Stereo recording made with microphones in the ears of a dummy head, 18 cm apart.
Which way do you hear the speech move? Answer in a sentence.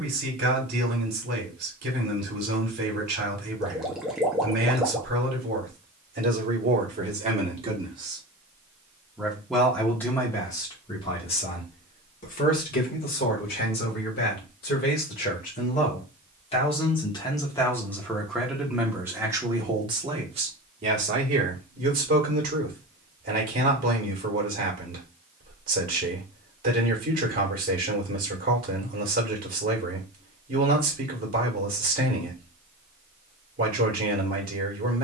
You can hear the speech go left and come back.